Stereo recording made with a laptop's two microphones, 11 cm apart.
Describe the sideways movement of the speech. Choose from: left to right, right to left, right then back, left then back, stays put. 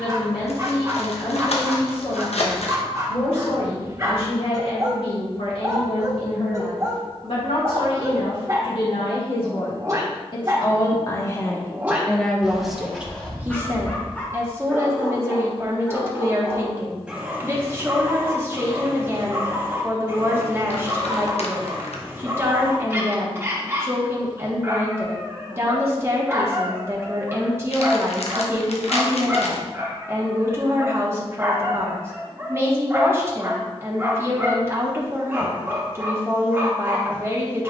left to right.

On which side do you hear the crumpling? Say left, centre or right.
left.